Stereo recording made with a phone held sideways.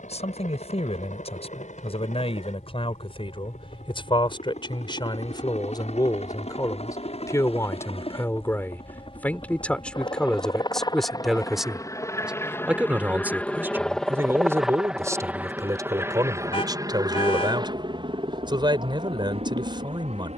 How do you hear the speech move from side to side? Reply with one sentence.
In this clip you hear the speech travel towards the right.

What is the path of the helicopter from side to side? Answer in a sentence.
In this clip you hear the helicopter travel towards the right.